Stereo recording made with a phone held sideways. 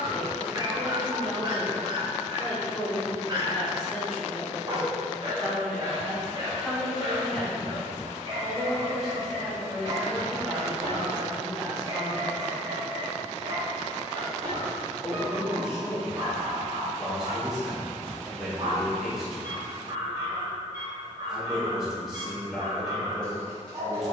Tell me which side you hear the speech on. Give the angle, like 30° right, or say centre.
centre.